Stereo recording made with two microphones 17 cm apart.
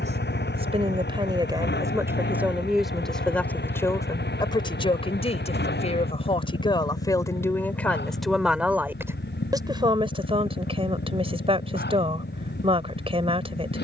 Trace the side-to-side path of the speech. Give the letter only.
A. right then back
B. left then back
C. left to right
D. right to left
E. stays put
B.